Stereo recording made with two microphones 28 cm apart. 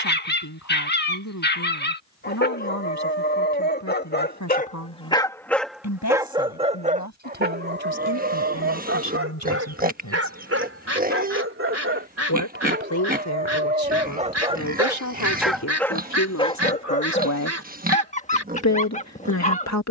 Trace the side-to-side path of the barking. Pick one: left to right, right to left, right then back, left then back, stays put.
right then back.